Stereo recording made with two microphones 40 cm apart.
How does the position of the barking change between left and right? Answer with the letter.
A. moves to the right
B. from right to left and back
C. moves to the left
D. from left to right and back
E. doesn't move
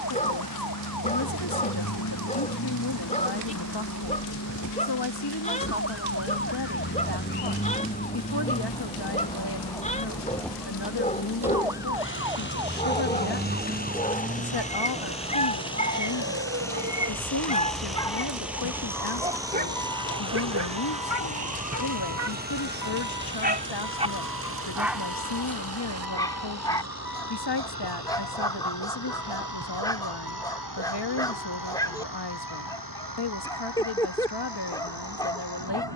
D.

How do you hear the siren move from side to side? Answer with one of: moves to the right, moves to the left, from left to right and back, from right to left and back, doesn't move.
moves to the right.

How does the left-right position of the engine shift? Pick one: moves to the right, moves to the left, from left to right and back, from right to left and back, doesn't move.
moves to the right.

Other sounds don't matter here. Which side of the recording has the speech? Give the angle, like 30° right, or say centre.
80° left.